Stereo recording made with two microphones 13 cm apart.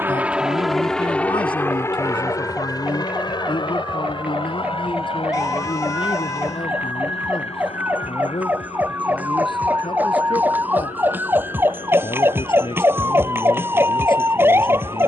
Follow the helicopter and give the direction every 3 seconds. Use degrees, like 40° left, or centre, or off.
10° left, 40° left, 50° left, 50° left, 50° left.